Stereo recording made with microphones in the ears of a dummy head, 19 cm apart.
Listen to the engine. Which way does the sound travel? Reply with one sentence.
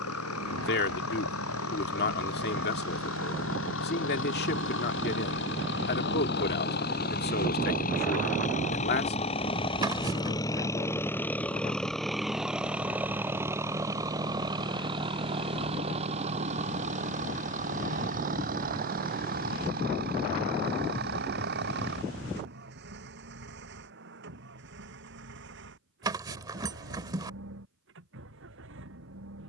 In this clip you hear the engine move from left to right.